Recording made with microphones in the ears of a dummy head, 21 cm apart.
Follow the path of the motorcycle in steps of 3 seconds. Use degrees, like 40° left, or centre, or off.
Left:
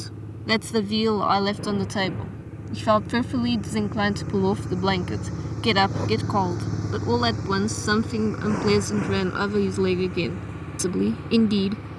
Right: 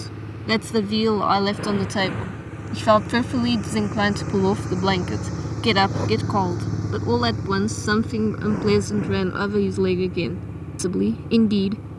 60° right, 30° right, 20° left, 60° left.